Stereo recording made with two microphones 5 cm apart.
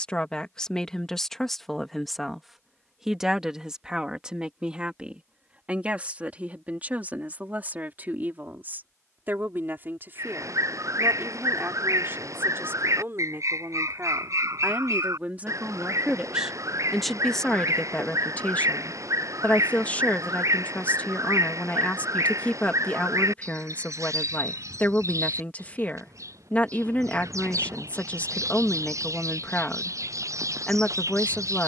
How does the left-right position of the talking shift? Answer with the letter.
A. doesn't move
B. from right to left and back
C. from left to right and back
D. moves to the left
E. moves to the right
C.